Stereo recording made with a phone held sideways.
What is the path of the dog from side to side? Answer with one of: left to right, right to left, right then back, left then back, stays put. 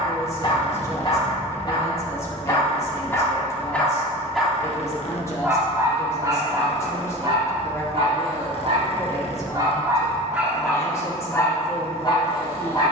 right then back.